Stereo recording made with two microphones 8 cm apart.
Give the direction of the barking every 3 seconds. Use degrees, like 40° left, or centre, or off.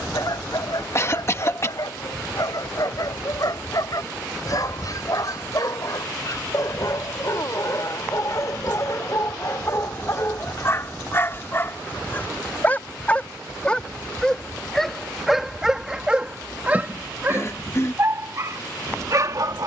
60° left, 50° left, 50° left, 40° left, 10° left, 20° right, 50° right.